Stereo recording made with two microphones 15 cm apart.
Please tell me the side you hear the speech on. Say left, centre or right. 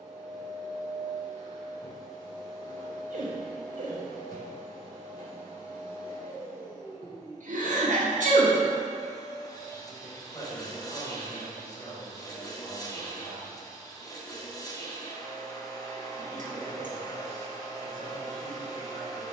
left.